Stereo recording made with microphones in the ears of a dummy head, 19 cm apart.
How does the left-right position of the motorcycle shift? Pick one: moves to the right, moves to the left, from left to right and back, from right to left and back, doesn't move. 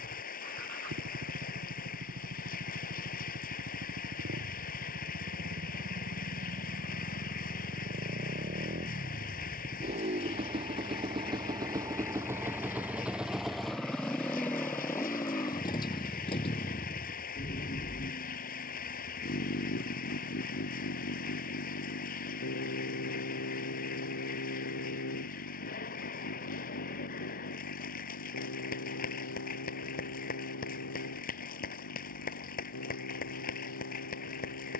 moves to the left.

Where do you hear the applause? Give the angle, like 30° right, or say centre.
40° left.